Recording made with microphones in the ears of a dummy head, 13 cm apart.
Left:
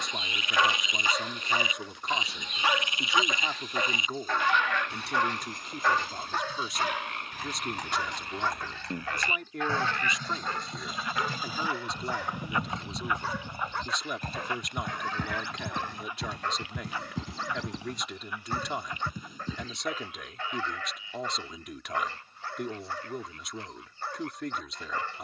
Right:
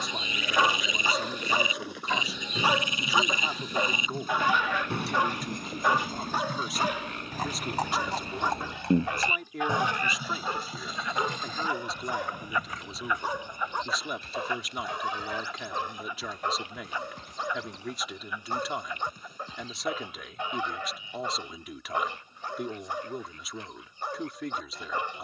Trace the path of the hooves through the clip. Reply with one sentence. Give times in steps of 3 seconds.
You can hear the hooves on the right from 0 s, in the centre from 9 s, on the left from 12 s and not at all from 21 s.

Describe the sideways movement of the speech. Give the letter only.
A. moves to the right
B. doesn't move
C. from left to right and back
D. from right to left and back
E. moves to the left
B.